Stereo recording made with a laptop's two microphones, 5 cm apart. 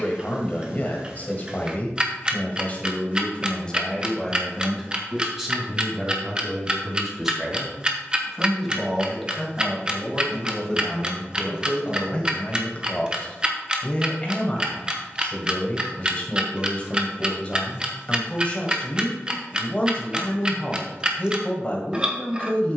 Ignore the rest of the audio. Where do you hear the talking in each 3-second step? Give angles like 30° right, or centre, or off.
30° left, centre, 10° right, 10° left, 20° left, 30° left, 30° left, 30° left.